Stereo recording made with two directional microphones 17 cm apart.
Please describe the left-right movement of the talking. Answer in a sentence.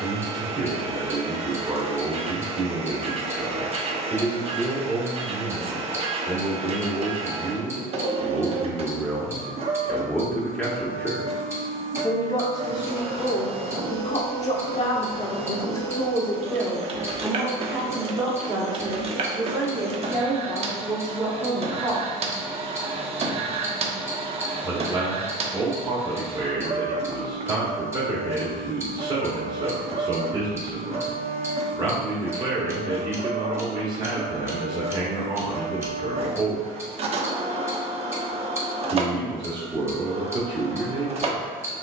In this clip you hear the talking move from right to left and back again.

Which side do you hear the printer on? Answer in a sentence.
You can hear the printer on the right.